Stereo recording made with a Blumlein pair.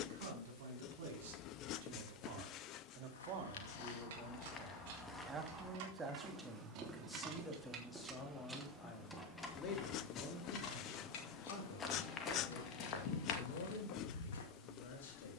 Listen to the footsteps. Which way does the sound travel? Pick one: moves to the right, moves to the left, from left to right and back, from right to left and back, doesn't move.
from left to right and back.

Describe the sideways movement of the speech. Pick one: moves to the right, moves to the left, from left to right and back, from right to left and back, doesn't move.
moves to the left.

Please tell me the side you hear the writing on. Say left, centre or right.
left.